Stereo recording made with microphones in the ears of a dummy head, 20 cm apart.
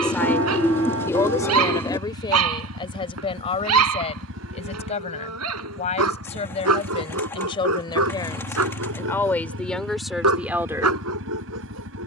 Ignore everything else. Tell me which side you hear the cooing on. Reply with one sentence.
In this clip you hear the cooing in the centre.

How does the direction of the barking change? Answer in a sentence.
You can hear the barking stay put.